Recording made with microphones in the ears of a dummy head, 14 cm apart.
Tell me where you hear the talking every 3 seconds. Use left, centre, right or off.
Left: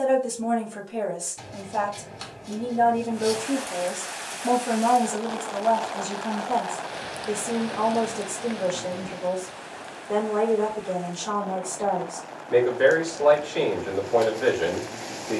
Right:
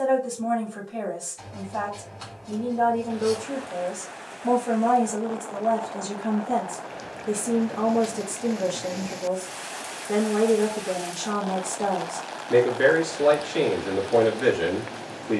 left, centre, right, right, right.